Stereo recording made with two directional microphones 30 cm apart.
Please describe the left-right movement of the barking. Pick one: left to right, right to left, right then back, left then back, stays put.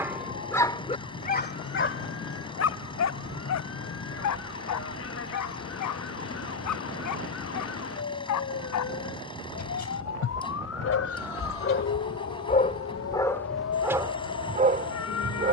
left then back.